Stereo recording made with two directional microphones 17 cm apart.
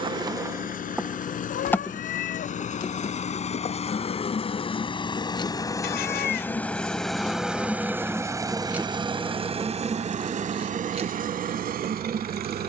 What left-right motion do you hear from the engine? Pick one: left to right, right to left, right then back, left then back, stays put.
left to right.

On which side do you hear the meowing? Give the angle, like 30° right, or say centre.
70° left.